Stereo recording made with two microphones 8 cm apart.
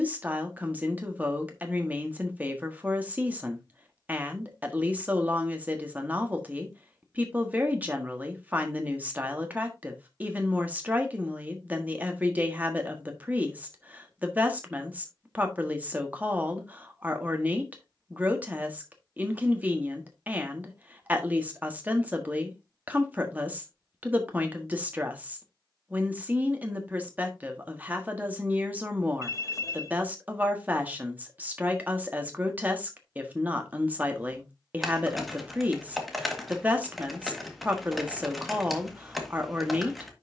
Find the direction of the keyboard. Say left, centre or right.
centre.